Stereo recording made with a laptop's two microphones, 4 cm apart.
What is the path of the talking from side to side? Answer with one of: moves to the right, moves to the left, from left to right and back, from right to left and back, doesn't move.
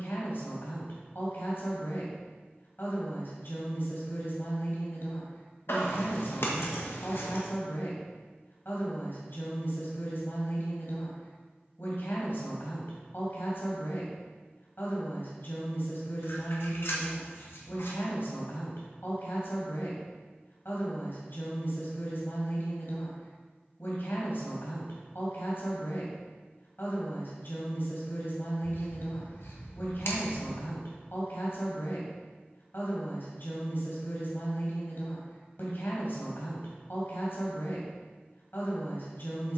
doesn't move.